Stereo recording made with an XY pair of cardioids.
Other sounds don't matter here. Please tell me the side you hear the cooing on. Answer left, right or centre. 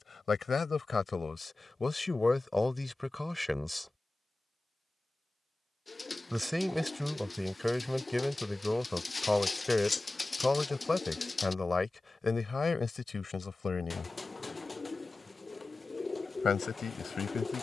left.